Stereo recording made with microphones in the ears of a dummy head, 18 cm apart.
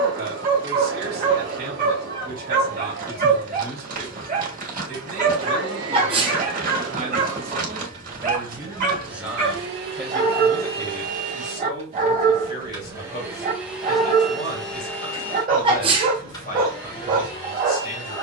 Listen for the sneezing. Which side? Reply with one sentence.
You can hear the sneezing on the right.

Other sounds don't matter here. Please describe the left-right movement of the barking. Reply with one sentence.
You can hear the barking stay in one place.